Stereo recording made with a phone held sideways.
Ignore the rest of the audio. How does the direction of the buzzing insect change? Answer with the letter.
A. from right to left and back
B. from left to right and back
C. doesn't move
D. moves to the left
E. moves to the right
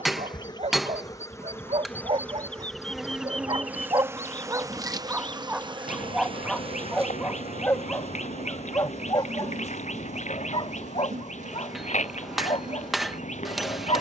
E.